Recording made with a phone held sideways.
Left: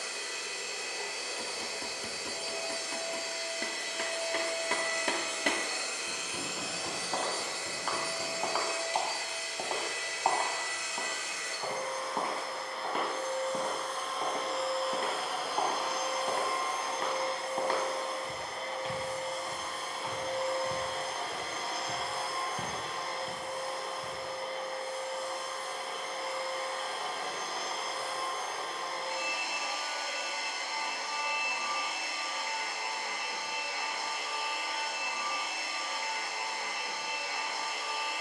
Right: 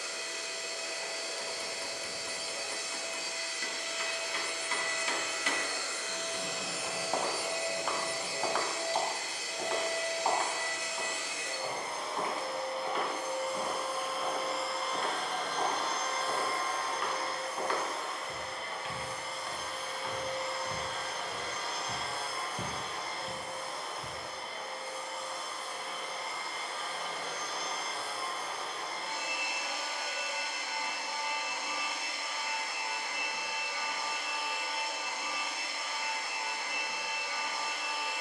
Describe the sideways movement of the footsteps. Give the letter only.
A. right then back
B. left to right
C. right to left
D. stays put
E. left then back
E.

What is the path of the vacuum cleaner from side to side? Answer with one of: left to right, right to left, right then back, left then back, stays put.
right then back.